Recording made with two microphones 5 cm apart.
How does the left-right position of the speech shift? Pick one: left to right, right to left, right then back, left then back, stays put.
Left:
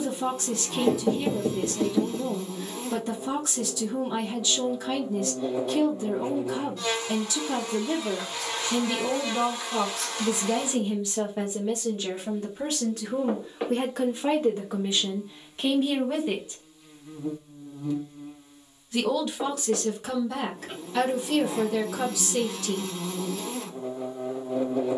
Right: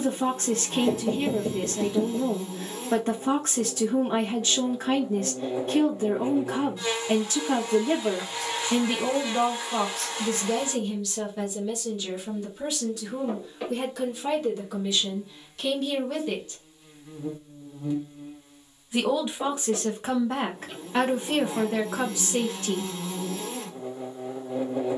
left then back.